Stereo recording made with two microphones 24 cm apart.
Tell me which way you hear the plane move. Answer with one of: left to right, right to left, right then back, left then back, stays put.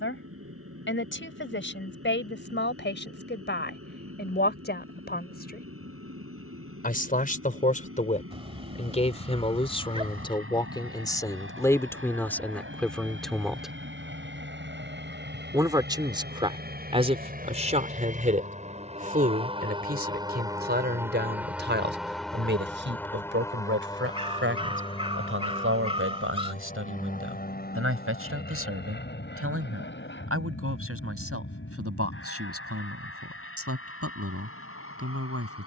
right to left.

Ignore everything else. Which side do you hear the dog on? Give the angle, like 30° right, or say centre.
20° right.